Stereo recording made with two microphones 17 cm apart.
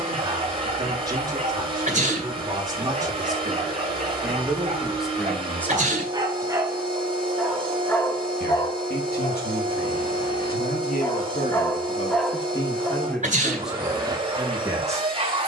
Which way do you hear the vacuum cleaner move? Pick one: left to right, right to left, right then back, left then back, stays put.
stays put.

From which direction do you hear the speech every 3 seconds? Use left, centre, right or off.
right, centre, left, left, centre.